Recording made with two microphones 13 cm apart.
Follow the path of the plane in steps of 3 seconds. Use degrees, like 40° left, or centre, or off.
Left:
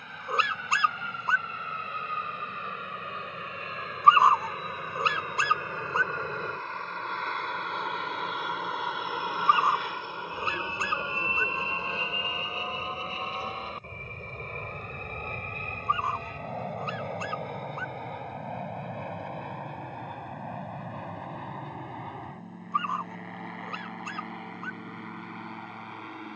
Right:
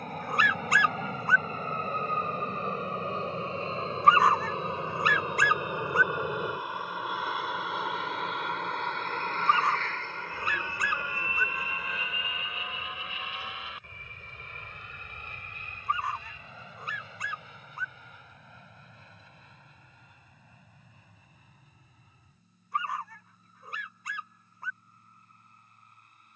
40° right, 30° right, 10° right, 20° left, 40° left, 50° left, 60° left, 60° left, 70° left.